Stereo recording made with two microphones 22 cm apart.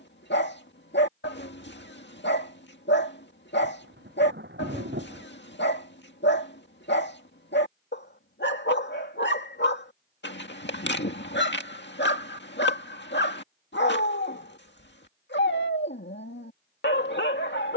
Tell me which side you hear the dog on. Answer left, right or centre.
left.